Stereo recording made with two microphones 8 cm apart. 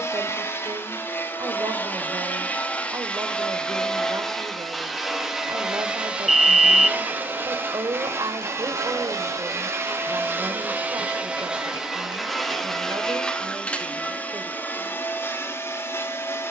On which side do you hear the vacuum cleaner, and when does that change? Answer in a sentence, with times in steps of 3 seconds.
You can hear the vacuum cleaner on the left from 0 s, in the centre from 3 s, on the right from 6 s, in the centre from 12 s and on the left from 15 s.